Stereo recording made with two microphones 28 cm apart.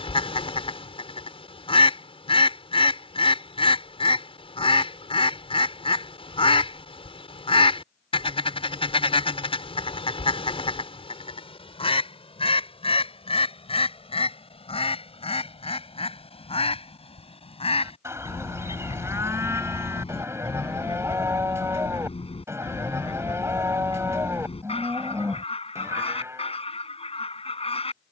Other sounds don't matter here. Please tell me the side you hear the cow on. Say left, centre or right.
centre.